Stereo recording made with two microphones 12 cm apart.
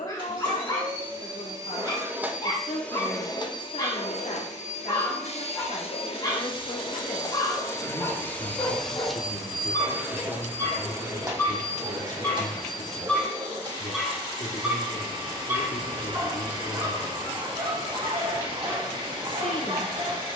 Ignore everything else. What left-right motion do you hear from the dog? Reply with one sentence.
You can hear the dog move from left to right.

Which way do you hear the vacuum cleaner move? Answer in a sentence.
You can hear the vacuum cleaner go left and come back.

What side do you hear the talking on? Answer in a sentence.
In this clip you hear the talking on the left.